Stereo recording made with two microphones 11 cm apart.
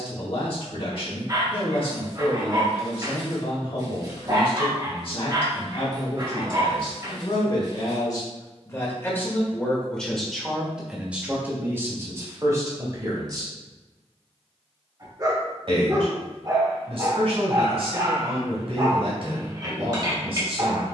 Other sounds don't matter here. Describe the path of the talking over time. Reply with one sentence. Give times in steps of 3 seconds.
You can hear the talking on the left from 0 s, in the centre from 9 s and on the right from 12 s.